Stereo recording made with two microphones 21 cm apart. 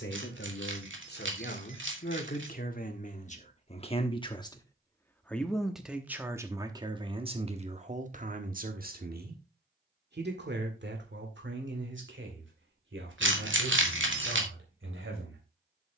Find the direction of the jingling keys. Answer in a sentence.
In this clip you hear the jingling keys on the right.